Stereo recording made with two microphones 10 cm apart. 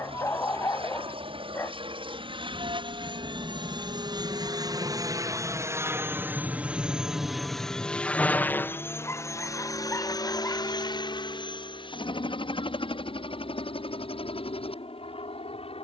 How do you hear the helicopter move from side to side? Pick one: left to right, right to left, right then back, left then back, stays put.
right to left.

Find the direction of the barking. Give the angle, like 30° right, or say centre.
30° left.